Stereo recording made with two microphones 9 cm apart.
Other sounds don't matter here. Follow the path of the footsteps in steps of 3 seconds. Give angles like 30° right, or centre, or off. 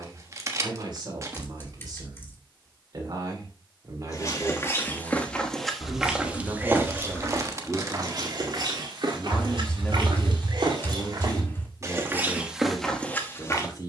off, 20° left, 40° right, 50° right, 10° left.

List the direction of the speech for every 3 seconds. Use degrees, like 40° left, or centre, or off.
50° right, 40° right, 10° right, 20° left, 40° left.